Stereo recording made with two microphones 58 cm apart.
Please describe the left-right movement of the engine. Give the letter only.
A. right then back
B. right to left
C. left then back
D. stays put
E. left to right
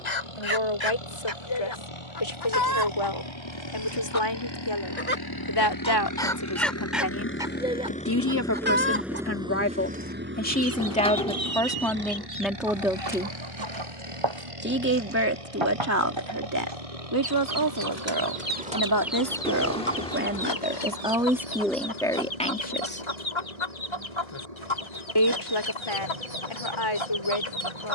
E.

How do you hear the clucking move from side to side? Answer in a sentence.
In this clip you hear the clucking move from left to right and back again.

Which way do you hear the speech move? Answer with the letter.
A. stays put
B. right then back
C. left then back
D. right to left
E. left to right
B.